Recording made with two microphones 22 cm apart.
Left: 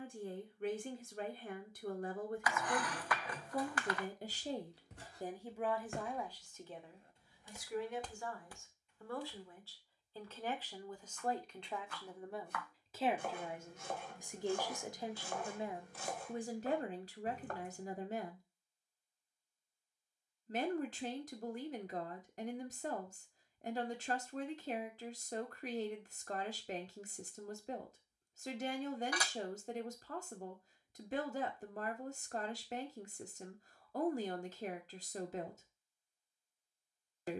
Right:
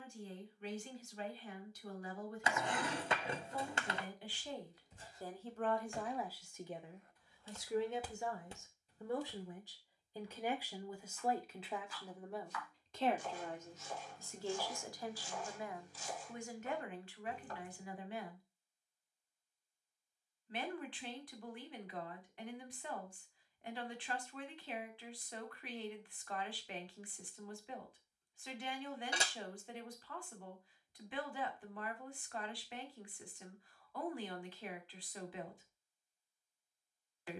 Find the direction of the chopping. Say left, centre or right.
left.